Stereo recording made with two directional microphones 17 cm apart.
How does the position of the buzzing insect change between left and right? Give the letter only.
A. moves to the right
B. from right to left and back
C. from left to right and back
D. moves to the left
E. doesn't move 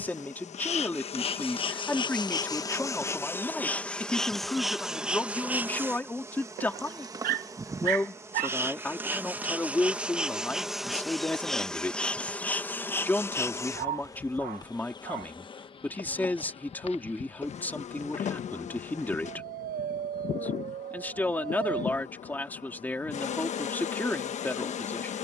C.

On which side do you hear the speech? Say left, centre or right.
centre.